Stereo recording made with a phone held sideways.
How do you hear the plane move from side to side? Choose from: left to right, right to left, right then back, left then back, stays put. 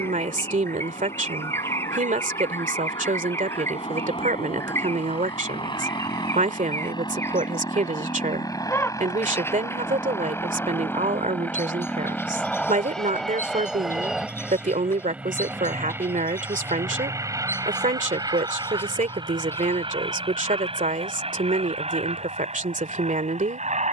left to right.